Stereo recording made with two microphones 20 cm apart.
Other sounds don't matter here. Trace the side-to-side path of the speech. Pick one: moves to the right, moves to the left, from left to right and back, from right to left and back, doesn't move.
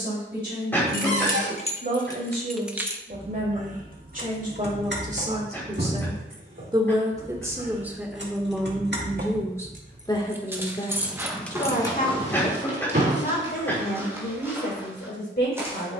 moves to the left.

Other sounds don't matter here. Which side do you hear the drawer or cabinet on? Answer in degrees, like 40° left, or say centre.
60° right.